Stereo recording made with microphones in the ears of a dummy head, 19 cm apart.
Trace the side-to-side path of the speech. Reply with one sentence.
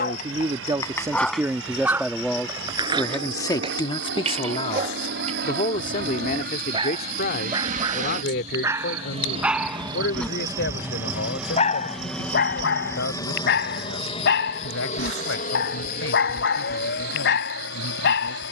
You can hear the speech move to the left.